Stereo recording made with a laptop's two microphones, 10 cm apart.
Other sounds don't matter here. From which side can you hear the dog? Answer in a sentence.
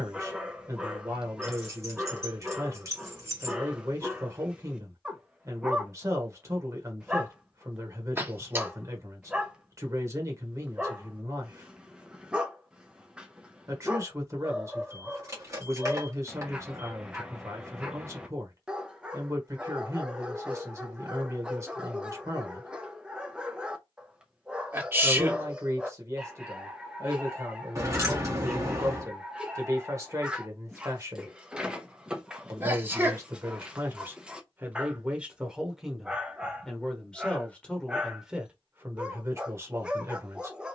In this clip you hear the dog in the centre.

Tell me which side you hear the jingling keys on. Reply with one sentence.
In this clip you hear the jingling keys on the right.